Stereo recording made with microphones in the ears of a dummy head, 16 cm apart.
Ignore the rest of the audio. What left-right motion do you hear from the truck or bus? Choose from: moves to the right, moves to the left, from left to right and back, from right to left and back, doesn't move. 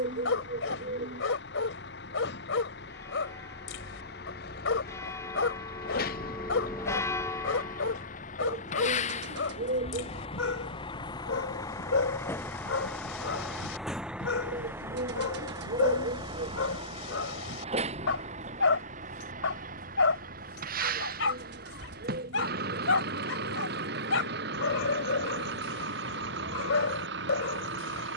moves to the right.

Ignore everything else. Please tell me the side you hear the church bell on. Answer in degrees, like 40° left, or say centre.
20° left.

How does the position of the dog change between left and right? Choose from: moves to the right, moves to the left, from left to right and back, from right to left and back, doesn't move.
doesn't move.